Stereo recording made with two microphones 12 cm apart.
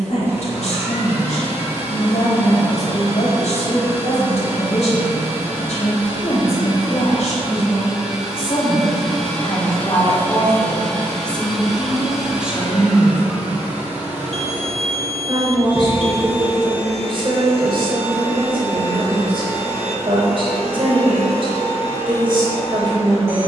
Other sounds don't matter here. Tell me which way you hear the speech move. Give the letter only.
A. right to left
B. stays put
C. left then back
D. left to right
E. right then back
D.